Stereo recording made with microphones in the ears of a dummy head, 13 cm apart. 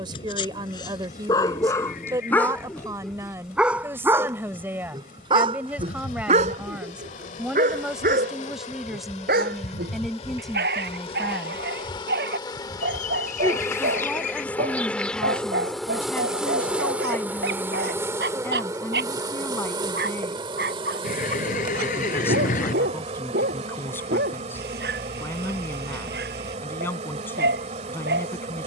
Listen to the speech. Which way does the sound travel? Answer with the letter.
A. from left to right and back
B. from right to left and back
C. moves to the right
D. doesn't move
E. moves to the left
E.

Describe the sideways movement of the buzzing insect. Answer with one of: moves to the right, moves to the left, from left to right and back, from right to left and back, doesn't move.
moves to the right.